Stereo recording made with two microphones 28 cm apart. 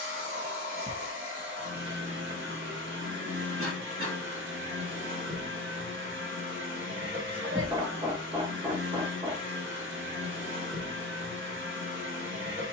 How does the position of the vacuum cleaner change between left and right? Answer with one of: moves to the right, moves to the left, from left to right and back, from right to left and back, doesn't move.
doesn't move.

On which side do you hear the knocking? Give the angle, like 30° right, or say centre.
20° right.